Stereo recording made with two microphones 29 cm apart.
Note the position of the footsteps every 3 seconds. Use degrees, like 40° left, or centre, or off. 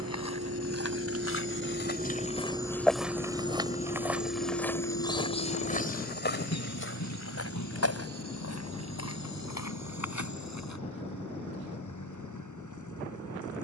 40° left, 10° left, 50° left, 70° left, off.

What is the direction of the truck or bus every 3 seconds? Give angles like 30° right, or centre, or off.
30° right, 40° left, 70° left, 80° left, 80° left.